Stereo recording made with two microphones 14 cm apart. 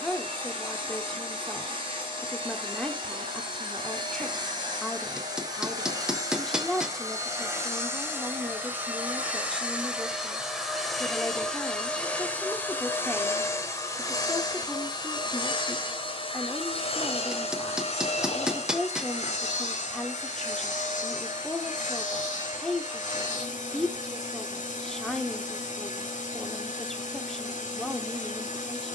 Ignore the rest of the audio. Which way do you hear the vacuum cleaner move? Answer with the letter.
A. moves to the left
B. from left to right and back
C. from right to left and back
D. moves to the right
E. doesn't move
A.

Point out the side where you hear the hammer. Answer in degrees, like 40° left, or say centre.
10° right.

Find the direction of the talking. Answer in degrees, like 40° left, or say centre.
centre.